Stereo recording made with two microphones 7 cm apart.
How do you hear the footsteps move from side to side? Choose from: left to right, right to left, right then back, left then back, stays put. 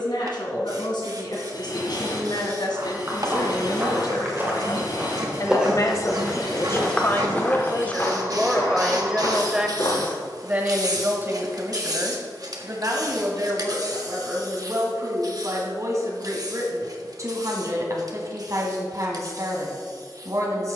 right to left.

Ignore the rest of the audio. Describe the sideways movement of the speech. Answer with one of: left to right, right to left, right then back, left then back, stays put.
left to right.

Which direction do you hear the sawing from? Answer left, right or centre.
left.